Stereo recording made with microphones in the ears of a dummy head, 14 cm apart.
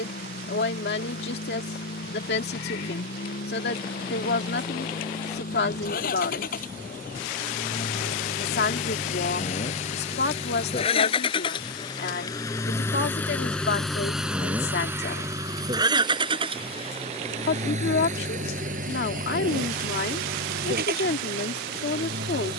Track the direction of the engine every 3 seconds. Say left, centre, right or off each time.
left, left, left, left, centre, right, right, right.